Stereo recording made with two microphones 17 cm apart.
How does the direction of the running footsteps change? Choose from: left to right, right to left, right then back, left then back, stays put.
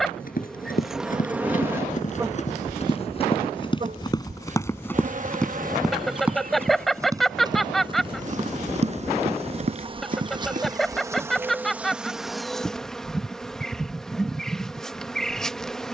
left to right.